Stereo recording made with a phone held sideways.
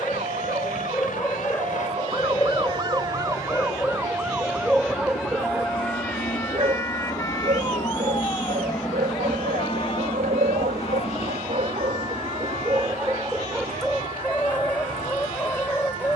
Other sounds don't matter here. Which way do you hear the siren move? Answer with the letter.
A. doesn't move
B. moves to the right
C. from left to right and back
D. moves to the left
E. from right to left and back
D.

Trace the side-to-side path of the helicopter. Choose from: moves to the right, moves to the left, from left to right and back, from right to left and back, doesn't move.
moves to the right.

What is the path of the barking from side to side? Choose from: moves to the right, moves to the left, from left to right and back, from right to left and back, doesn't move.
from left to right and back.